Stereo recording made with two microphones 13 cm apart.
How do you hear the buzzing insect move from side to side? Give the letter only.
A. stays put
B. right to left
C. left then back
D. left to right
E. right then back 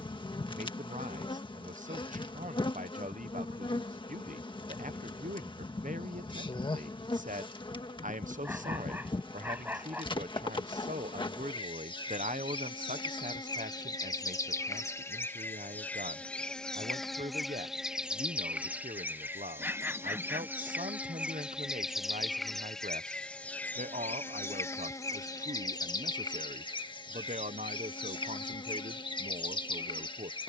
E.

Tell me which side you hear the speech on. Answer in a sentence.
In this clip you hear the speech on the right.